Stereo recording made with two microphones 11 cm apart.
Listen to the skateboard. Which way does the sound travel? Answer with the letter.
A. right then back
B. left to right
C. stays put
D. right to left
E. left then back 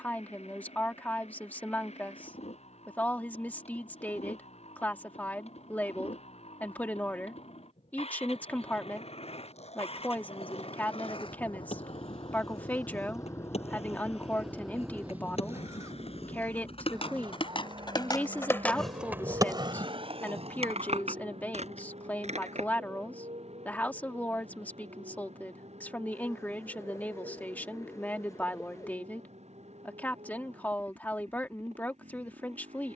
B.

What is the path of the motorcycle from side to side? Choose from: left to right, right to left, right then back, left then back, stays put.
left to right.